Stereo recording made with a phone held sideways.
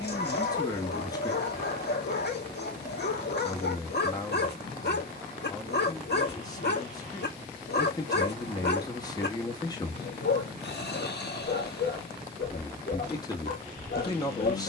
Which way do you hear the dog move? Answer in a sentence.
You can hear the dog stay in one place.